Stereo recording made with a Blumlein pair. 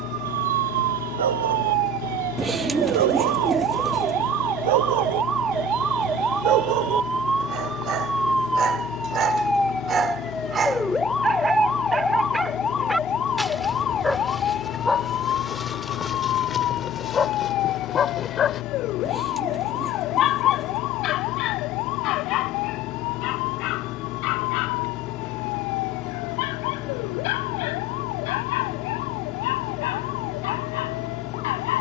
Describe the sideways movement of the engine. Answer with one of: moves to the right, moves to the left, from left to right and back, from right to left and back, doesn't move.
doesn't move.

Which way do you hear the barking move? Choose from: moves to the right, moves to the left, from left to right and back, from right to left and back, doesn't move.
moves to the left.